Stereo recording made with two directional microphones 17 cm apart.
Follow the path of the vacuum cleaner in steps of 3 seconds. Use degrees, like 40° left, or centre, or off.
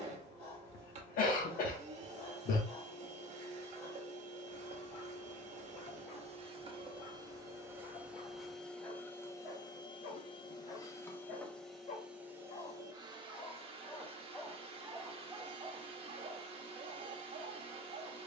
40° right, 40° right, 20° right, 20° left, 30° right, 40° right.